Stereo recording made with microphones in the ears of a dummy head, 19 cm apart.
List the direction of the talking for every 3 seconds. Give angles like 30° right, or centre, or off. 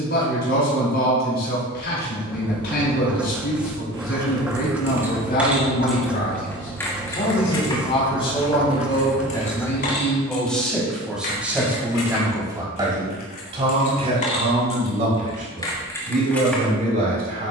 50° left, 50° left, 30° left, centre, 30° right, 40° right.